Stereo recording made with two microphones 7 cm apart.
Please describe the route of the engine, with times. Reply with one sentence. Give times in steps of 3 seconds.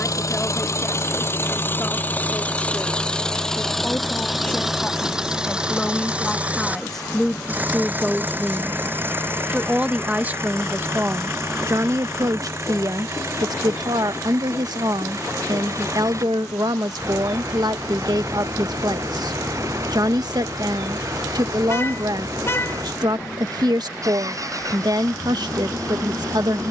In this clip you hear the engine on the left from 0 s, in the centre from 3 s and on the right from 6 s.